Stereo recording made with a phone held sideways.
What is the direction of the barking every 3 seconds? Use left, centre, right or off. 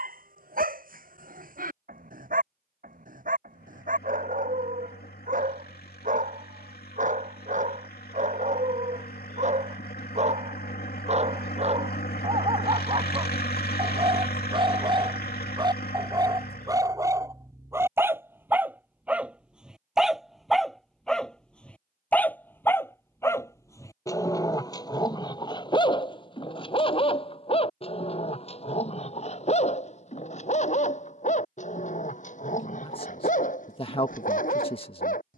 right, right, right, right, right, right, centre, centre, left, left, left, left.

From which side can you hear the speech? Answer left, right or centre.
left.